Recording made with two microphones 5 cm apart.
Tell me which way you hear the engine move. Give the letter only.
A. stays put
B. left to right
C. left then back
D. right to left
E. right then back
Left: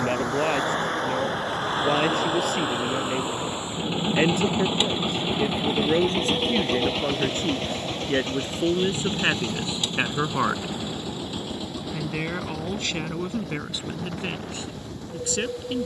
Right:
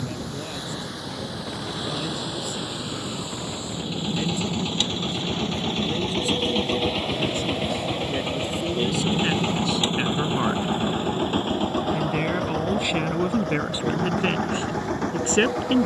B.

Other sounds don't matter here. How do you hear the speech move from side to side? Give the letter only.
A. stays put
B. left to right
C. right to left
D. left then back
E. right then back
B.